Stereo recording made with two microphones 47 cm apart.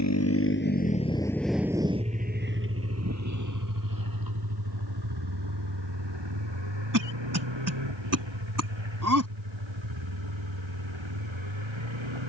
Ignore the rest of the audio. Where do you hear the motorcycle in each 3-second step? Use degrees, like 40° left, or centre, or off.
centre, 50° right, 60° right, 70° right.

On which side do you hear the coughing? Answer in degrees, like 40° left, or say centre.
40° right.